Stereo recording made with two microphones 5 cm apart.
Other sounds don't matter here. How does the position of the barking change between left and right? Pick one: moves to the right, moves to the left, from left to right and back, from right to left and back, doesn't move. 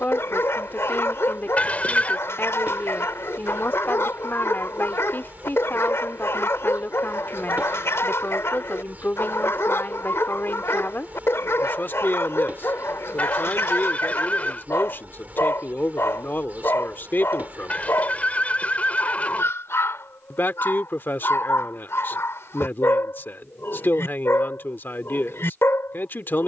doesn't move.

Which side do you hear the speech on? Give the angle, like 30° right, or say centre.
40° left.